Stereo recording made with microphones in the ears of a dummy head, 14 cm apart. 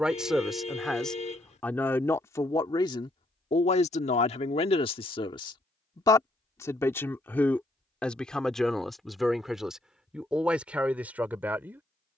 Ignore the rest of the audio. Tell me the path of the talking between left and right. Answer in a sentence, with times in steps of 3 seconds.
In this clip you hear the talking in the centre from 0 s, on the left from 3 s and in the centre from 6 s.